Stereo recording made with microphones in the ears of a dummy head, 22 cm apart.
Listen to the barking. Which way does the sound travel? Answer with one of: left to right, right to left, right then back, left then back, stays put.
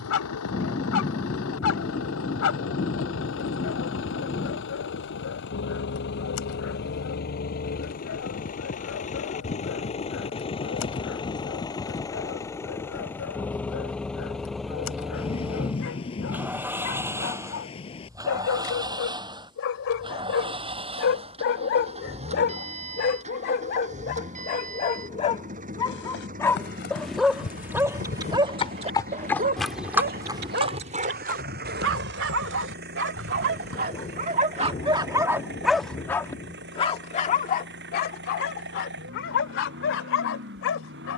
right then back.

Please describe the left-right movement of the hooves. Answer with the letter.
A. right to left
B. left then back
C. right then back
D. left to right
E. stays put
D.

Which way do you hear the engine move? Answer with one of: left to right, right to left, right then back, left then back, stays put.
left to right.